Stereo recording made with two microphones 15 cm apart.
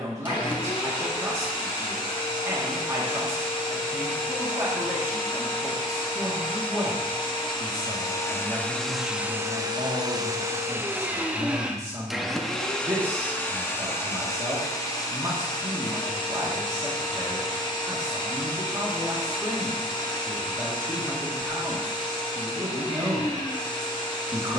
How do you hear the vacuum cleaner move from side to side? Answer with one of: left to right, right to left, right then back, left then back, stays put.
right then back.